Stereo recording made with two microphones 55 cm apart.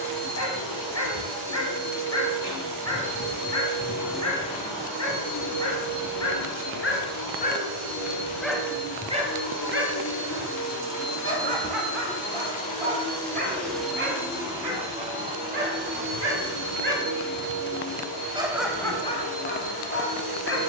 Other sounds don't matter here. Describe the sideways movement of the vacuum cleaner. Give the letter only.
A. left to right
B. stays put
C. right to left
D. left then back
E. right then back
D.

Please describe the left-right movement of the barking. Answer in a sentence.
In this clip you hear the barking move from left to right and back again.